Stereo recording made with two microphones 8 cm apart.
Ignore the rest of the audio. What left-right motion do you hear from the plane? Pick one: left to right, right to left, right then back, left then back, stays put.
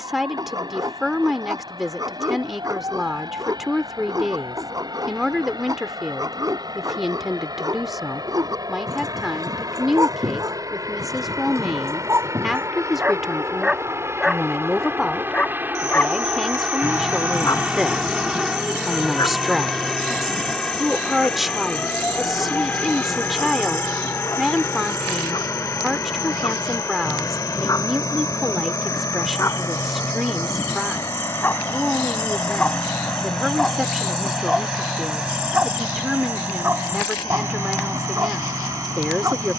right to left.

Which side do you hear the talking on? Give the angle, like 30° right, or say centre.
centre.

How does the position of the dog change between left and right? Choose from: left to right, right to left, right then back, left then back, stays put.
left then back.